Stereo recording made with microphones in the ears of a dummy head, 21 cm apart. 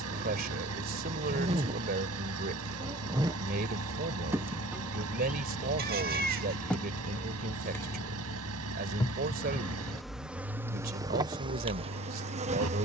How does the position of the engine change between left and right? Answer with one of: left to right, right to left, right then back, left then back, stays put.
stays put.